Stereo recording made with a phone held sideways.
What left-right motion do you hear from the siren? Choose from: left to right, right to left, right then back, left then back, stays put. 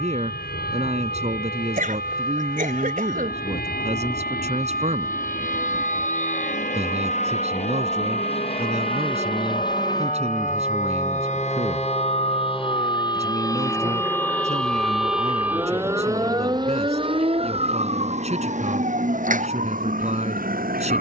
left to right.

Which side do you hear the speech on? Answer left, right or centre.
right.